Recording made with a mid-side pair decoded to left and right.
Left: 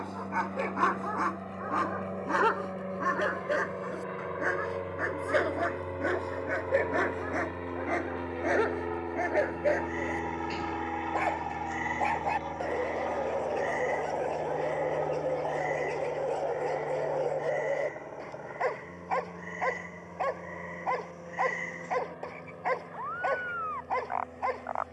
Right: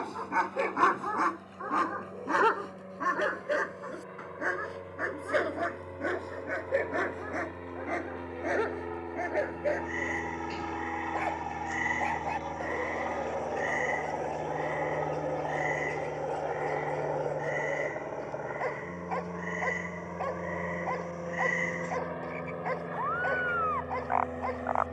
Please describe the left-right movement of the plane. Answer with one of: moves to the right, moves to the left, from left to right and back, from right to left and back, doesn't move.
moves to the right.